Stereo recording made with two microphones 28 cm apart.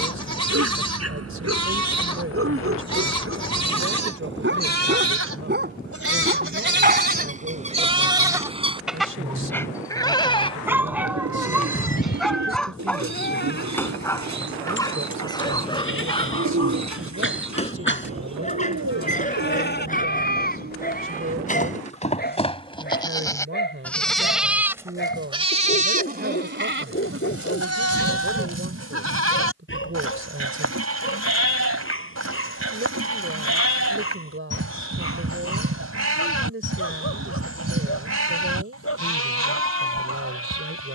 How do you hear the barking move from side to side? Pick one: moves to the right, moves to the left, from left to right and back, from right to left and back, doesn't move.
moves to the left.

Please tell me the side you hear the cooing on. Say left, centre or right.
right.